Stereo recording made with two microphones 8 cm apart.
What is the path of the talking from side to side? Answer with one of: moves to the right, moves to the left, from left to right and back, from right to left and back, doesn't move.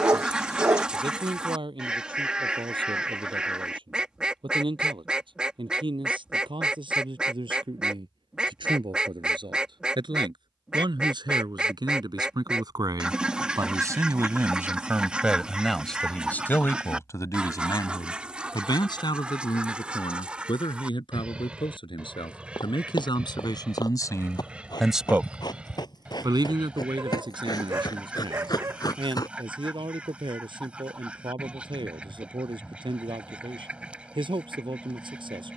from right to left and back.